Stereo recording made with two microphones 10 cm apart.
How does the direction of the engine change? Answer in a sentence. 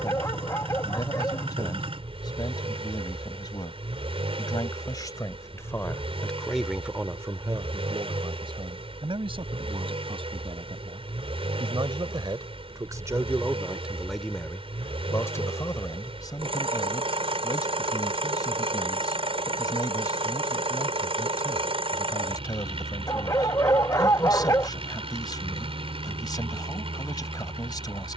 You can hear the engine stay put.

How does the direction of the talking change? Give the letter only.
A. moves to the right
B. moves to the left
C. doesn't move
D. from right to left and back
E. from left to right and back
E.